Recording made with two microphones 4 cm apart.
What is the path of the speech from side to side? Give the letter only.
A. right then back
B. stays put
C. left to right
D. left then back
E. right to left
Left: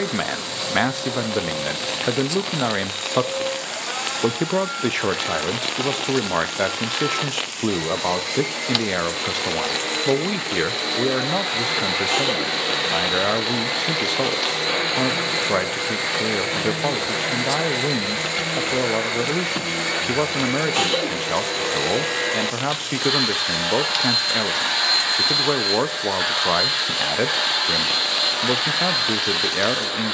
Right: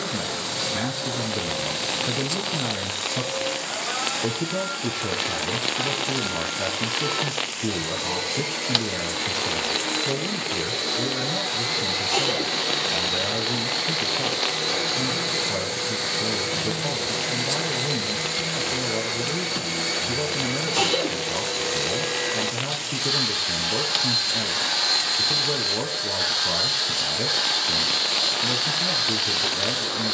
B.